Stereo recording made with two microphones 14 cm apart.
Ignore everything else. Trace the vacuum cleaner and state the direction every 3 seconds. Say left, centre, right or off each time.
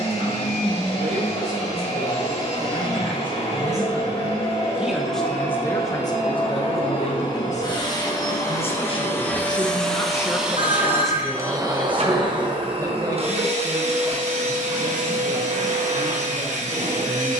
left, left, left, centre, right, right.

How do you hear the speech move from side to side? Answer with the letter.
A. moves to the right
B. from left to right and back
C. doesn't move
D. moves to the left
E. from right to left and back
E.